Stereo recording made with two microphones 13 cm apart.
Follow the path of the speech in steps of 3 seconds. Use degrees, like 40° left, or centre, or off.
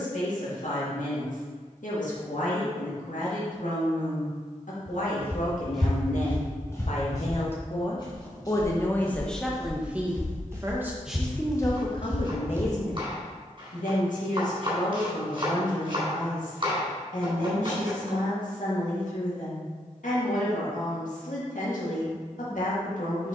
70° left, 70° left, 50° left, centre, 70° left, 70° left, 70° left, 70° left.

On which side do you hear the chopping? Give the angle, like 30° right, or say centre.
40° right.